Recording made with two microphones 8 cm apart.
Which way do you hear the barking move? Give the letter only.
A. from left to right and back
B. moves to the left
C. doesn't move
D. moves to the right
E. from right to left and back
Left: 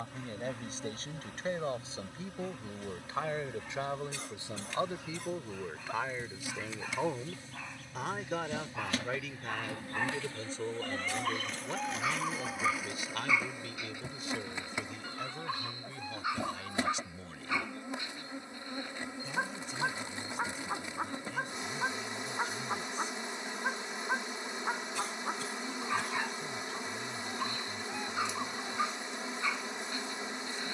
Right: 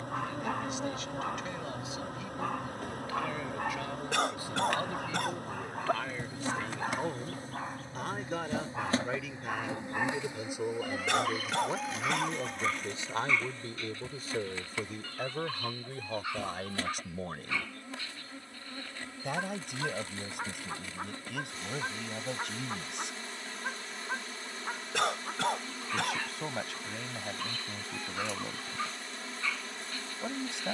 B.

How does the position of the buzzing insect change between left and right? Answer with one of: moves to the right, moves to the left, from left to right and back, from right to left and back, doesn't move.
moves to the left.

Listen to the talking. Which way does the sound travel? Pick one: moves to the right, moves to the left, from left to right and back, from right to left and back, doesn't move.
moves to the right.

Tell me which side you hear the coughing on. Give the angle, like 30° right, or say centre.
70° right.